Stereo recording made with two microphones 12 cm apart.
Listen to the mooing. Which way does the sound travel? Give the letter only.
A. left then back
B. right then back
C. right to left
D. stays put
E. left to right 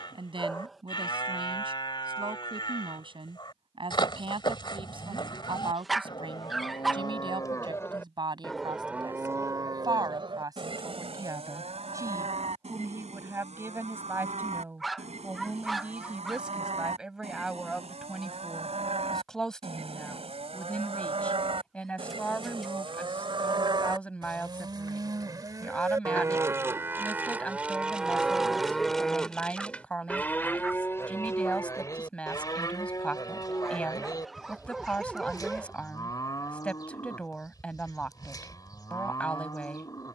B.